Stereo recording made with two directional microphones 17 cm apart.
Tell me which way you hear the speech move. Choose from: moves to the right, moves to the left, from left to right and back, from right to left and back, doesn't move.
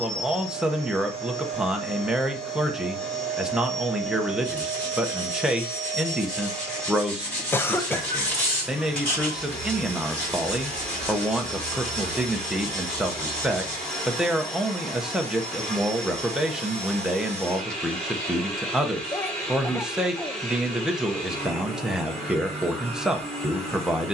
doesn't move.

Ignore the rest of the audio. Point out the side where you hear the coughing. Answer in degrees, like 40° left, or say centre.
10° left.